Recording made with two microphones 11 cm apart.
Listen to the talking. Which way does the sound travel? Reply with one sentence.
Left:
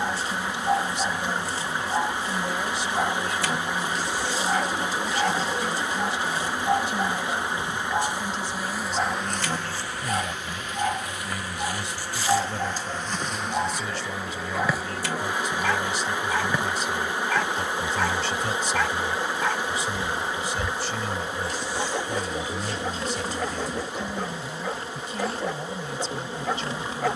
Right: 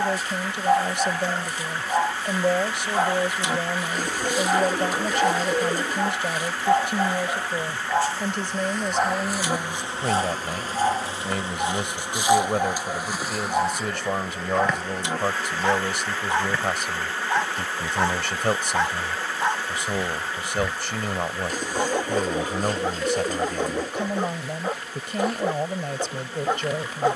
You can hear the talking stay put.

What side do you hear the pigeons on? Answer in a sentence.
You can hear the pigeons on the right.